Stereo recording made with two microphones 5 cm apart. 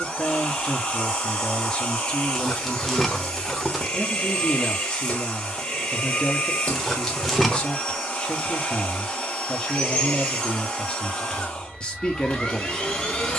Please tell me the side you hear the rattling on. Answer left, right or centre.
centre.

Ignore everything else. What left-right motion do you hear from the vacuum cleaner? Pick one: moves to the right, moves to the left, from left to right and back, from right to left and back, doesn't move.
doesn't move.